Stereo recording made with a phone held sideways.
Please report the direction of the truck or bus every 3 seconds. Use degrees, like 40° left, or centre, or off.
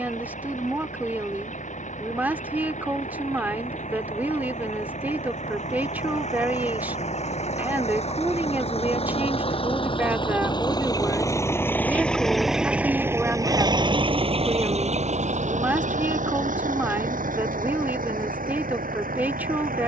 70° left, 60° left, 60° left, 30° left, 20° right, 70° right, 80° right.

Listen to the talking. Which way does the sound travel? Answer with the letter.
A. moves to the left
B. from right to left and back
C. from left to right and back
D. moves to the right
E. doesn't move
E.